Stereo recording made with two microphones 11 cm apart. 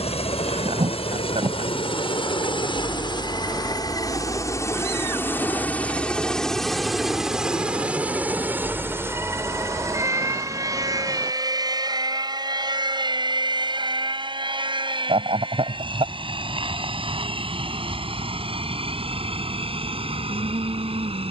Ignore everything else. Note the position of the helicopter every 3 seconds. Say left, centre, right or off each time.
left, left, centre, right, right, right, right.